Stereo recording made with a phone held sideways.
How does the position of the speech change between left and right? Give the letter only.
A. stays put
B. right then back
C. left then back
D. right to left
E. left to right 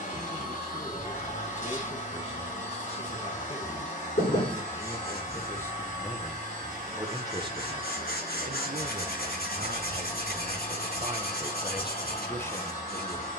B.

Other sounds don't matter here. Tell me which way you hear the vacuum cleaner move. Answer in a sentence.
You can hear the vacuum cleaner stay put.